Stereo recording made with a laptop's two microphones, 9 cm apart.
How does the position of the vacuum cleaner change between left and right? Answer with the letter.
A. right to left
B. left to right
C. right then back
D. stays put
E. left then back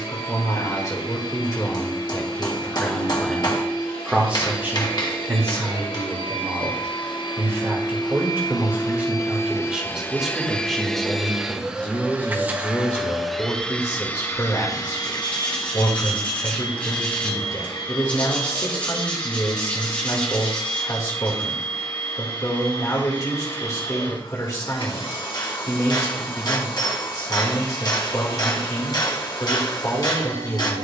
C.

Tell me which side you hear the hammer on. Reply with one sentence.
In this clip you hear the hammer on the left.